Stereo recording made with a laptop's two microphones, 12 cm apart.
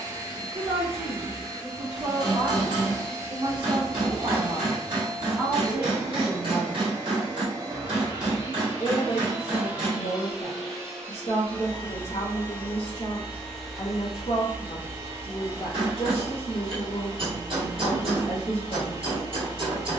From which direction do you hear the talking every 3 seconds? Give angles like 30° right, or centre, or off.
50° right, 30° right, 20° left, 60° left, 60° left, 60° left, 60° left.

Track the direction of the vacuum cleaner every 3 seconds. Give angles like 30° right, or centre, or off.
30° right, 30° right, 30° right, centre, centre, 30° right, 30° right.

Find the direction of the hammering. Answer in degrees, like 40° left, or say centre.
40° right.